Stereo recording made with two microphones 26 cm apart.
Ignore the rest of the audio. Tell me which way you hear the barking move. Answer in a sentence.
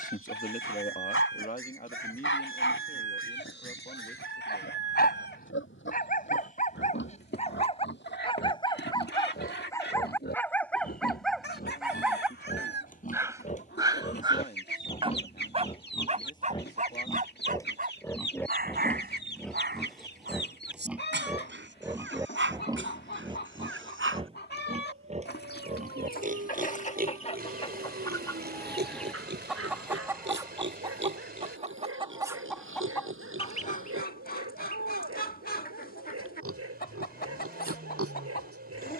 In this clip you hear the barking move to the right.